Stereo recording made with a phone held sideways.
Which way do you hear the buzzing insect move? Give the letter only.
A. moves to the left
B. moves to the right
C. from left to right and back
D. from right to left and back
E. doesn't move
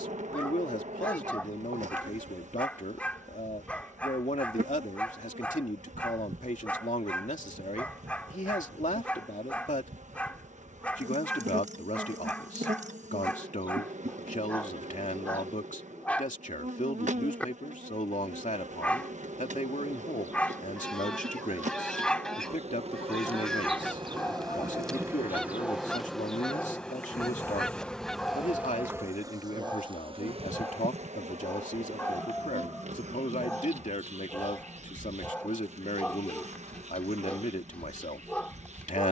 D.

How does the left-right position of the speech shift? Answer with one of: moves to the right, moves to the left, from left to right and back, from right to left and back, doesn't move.
doesn't move.